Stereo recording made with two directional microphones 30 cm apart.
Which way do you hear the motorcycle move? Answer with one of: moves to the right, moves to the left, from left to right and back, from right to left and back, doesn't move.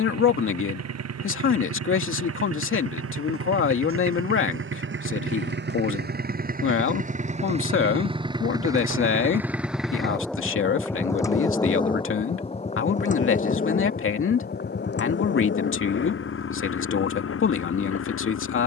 moves to the left.